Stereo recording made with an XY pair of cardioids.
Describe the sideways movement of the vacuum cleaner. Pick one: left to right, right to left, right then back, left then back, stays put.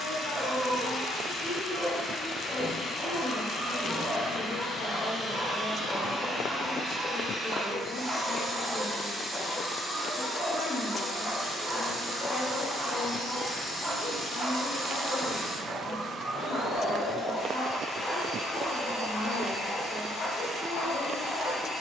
right then back.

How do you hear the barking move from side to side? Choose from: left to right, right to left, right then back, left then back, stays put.
right to left.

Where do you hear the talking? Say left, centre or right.
left.